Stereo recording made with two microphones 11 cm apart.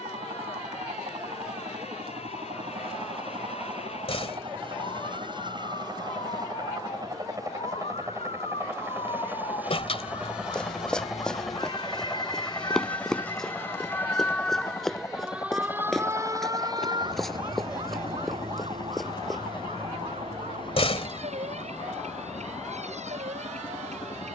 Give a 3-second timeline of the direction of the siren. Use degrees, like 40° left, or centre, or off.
70° left, 70° left, 60° left, 50° left, 20° left, 30° right, 60° right, 80° right.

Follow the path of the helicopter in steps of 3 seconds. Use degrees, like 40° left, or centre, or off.
60° right, 50° right, 30° right, 10° right, 10° left, 30° left, 40° left, 50° left.